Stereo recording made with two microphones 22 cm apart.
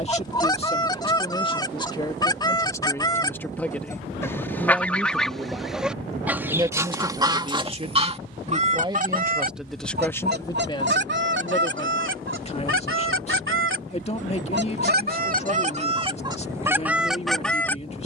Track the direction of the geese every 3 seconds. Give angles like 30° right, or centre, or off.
20° left, 10° left, 20° right, 50° right, 60° right, 20° right.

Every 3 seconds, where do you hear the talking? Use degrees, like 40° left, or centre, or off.
20° left, centre, 20° right, 10° left, 30° left, 30° left.